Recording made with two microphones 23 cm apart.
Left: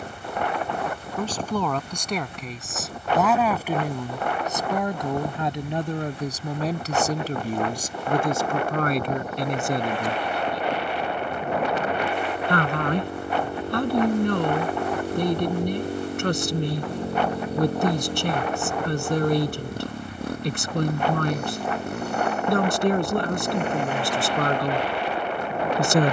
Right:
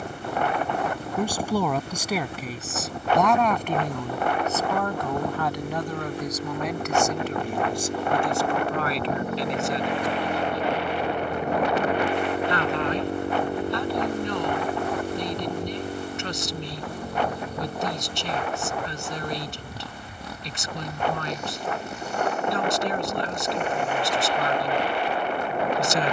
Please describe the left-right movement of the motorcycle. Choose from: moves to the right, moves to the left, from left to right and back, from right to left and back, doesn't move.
moves to the left.